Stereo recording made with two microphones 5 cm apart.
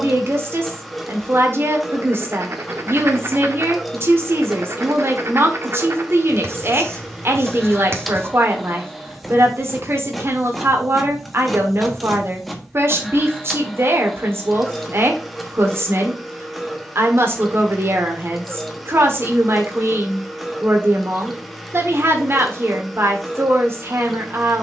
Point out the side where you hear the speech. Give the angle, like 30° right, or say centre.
50° right.